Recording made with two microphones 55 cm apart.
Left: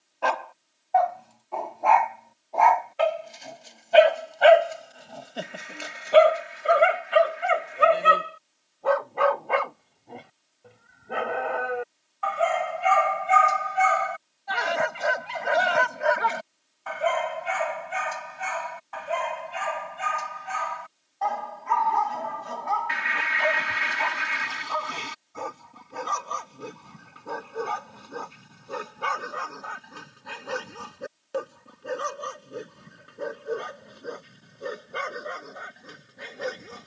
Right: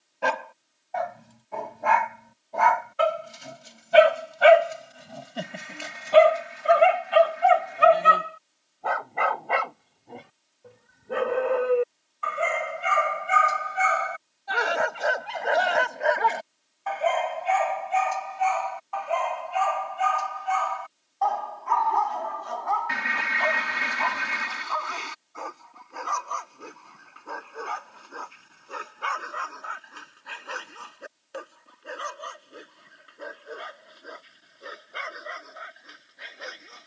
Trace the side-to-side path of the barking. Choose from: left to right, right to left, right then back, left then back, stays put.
right to left.